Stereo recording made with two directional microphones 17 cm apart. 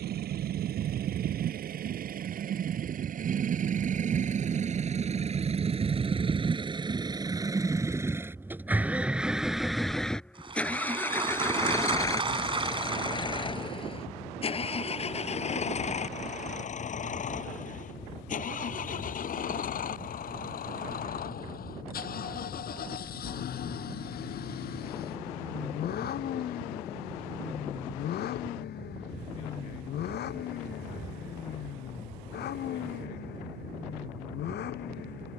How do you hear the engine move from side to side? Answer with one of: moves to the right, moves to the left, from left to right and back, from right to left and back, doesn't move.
moves to the left.